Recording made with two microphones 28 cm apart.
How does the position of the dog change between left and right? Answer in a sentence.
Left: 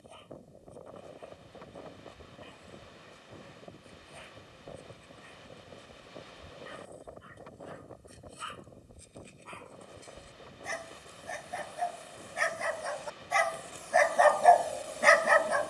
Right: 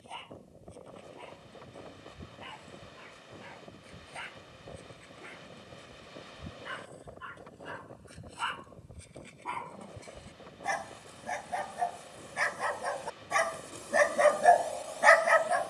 In this clip you hear the dog travel towards the left.